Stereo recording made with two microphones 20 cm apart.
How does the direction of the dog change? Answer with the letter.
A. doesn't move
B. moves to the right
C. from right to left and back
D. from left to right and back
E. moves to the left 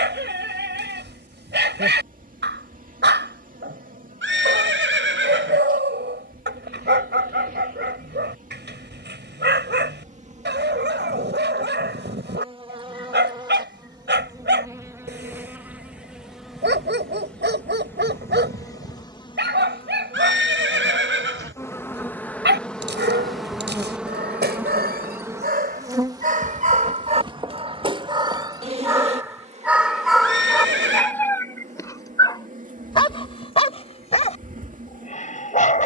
E.